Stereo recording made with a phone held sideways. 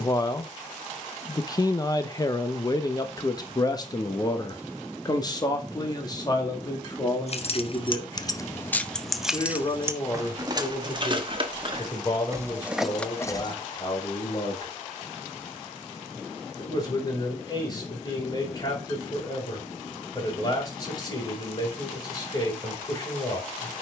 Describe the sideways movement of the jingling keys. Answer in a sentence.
In this clip you hear the jingling keys go right and come back.